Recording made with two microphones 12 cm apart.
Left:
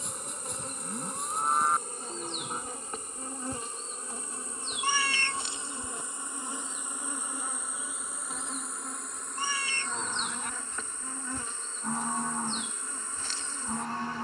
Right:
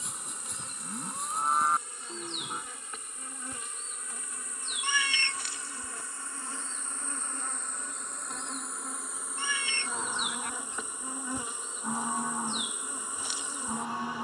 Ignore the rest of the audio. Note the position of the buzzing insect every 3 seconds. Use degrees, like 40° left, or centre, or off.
50° left, 30° left, 10° left, 10° right, 10° right.